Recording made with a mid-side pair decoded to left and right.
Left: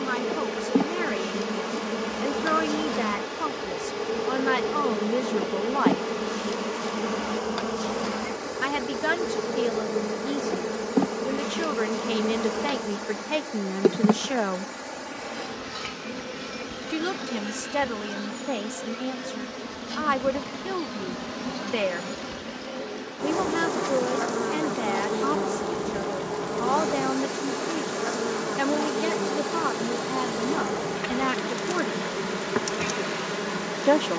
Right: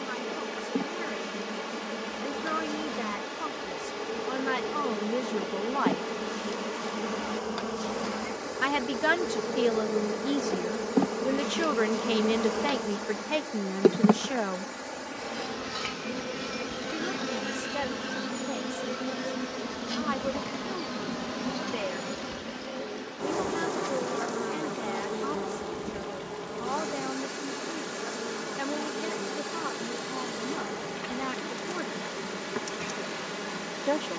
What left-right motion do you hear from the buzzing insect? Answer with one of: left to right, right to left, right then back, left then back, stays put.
right then back.